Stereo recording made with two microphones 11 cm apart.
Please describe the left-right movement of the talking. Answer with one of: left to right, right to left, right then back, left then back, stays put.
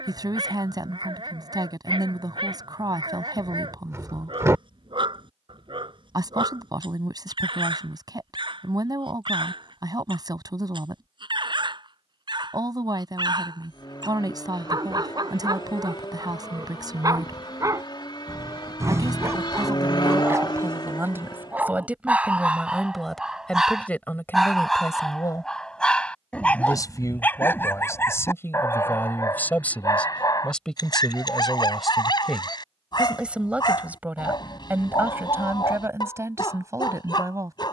left then back.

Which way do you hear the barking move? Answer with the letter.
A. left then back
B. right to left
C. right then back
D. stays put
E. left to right
B.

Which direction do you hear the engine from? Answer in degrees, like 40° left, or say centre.
40° left.